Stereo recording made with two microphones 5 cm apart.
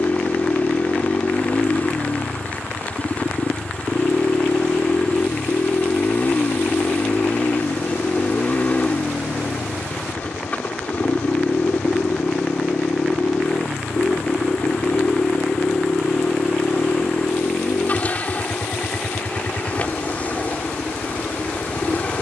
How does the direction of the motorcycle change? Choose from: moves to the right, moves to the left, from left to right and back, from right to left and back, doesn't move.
doesn't move.